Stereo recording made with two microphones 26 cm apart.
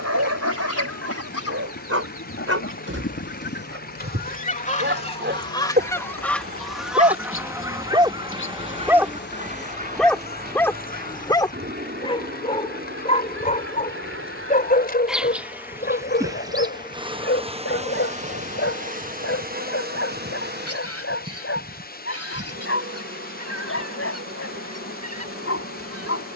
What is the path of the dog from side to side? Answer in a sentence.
In this clip you hear the dog move to the left.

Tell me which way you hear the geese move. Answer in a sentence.
In this clip you hear the geese go from the left side to the right.